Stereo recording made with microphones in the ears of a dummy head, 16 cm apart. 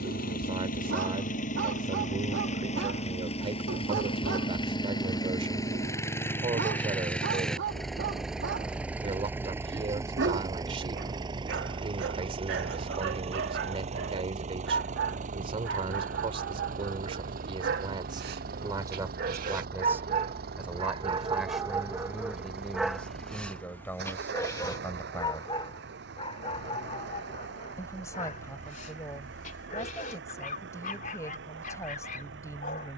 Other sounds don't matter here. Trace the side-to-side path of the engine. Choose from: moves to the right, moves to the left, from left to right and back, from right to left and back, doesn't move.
moves to the right.